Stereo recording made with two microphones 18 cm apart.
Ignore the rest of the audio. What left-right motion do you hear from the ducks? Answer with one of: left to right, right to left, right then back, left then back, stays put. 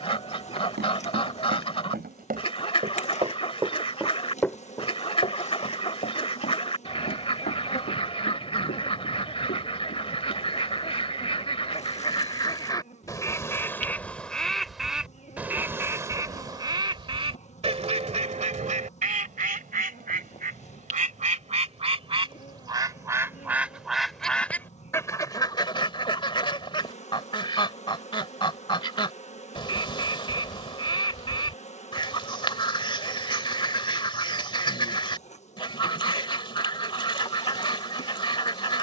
right then back.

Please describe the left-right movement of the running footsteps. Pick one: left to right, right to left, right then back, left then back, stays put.
right to left.